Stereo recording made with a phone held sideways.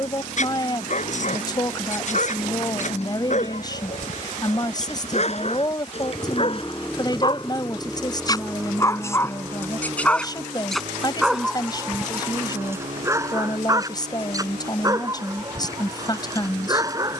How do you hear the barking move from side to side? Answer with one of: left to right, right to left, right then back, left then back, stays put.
left to right.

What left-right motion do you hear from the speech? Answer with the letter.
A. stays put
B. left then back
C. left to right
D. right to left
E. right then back
A.